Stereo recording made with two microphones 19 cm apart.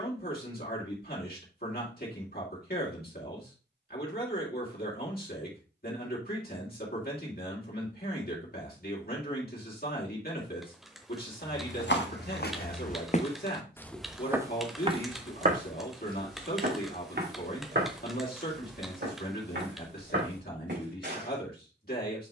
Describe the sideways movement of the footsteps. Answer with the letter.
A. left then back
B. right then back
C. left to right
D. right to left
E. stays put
C.